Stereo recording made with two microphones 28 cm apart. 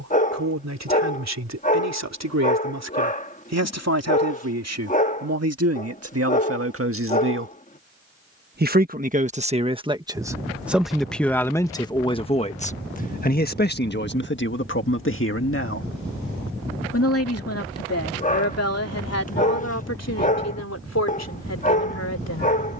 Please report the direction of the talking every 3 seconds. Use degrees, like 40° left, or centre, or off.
70° right, 60° right, 50° right, 10° right, 30° left, 50° left, 60° left, 70° left.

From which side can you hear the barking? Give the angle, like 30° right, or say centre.
30° left.